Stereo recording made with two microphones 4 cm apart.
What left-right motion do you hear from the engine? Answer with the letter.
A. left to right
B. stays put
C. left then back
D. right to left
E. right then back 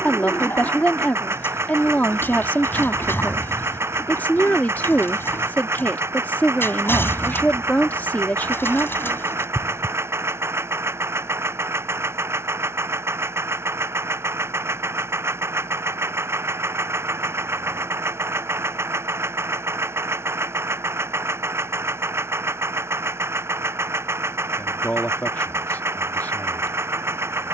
B.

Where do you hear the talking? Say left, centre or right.
left.